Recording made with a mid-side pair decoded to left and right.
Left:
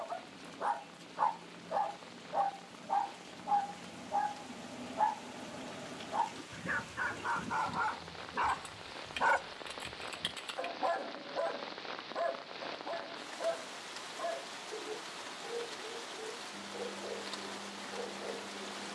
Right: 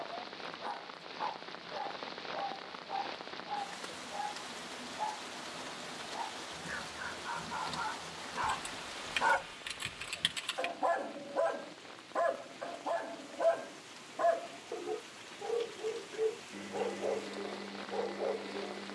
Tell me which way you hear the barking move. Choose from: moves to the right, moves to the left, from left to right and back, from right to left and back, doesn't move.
moves to the right.